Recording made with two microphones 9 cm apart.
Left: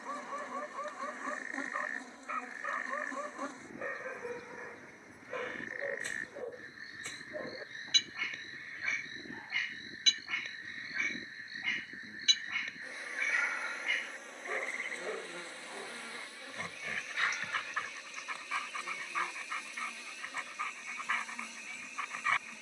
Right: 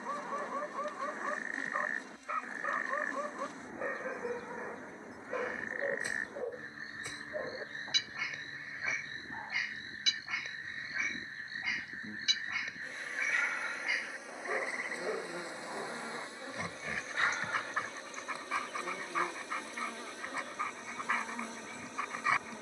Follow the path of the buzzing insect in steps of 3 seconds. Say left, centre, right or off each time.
left, left, left, left, centre, right, right, right.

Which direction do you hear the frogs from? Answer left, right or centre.
right.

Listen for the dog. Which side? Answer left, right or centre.
centre.